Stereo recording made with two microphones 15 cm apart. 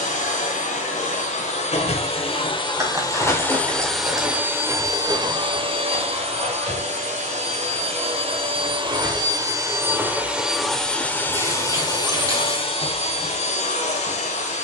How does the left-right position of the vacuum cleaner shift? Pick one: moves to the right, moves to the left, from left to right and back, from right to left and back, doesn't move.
from left to right and back.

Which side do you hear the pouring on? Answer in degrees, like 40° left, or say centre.
20° right.